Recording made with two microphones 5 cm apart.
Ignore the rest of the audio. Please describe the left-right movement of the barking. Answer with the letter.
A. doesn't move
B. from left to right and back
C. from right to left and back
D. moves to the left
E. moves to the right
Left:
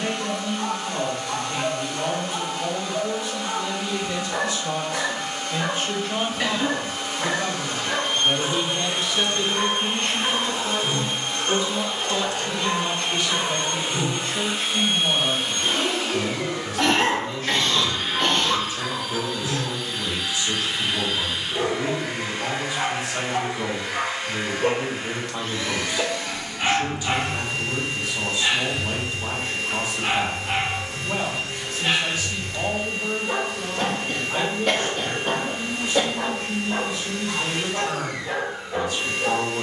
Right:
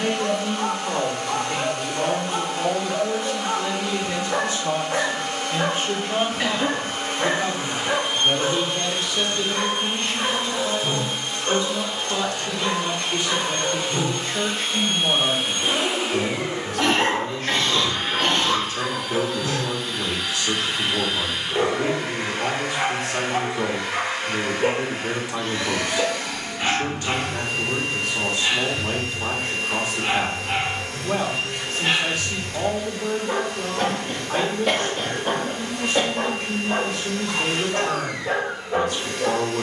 C.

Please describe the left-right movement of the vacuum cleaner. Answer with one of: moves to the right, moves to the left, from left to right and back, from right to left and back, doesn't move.
from right to left and back.